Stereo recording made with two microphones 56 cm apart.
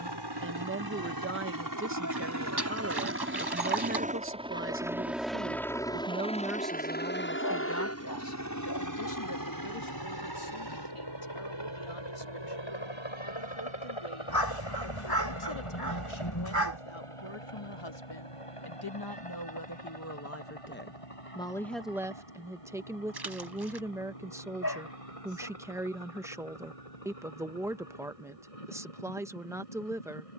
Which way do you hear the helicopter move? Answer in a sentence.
You can hear the helicopter travel towards the left.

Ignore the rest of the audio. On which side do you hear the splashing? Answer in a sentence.
You can hear the splashing on the right.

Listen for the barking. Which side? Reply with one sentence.
You can hear the barking on the left.